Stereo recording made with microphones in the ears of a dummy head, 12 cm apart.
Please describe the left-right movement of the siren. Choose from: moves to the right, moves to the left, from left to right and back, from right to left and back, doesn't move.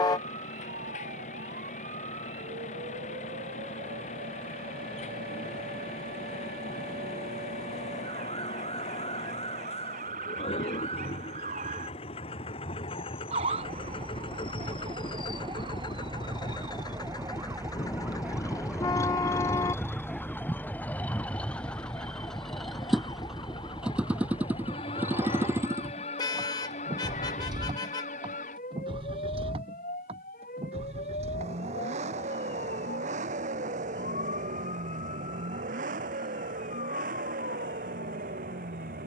moves to the left.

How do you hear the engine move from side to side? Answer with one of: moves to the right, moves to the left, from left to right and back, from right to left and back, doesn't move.
moves to the right.